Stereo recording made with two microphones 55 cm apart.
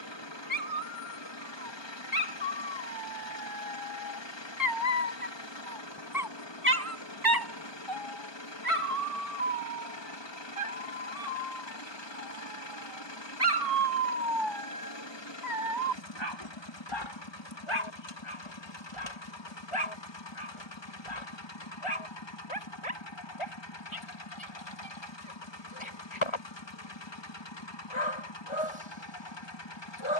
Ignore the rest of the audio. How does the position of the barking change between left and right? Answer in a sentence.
You can hear the barking move from left to right and back again.